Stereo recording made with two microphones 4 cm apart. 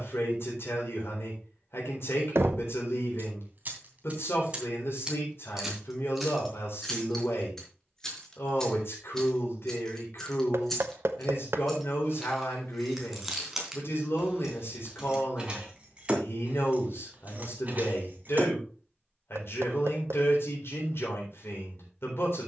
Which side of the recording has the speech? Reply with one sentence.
You can hear the speech on the left.